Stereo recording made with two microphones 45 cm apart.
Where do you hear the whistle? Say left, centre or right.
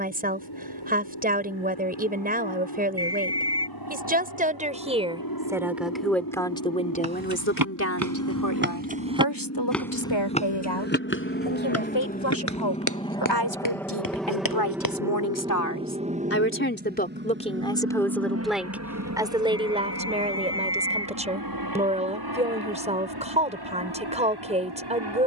right.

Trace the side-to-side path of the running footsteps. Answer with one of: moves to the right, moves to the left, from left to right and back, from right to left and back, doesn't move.
moves to the left.